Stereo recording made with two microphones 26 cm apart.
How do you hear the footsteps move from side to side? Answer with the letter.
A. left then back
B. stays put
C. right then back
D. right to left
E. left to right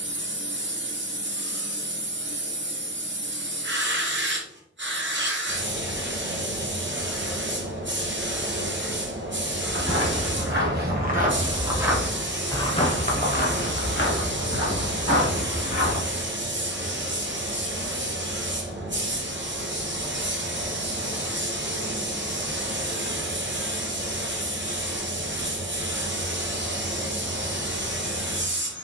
D.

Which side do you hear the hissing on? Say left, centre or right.
right.